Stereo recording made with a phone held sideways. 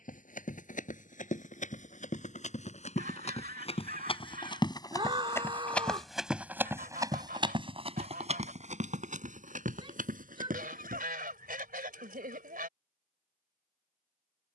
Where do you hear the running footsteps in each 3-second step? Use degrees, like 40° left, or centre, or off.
60° left, 30° left, 30° right, 60° right, off.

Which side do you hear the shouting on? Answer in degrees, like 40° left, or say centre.
30° right.